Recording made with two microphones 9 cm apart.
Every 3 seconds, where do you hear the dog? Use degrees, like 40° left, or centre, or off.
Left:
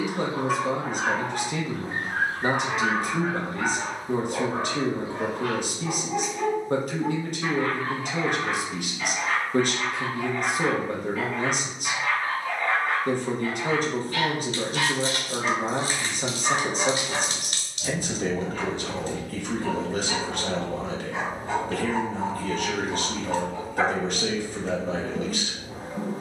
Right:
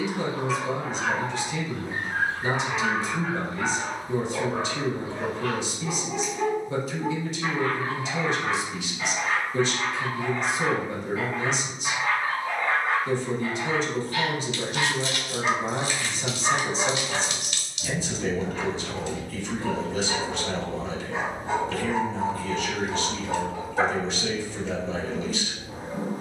40° left, 30° left, 10° right, 20° right, 20° right, 20° right, 20° right, 20° right, 20° right.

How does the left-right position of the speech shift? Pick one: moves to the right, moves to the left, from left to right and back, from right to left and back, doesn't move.
doesn't move.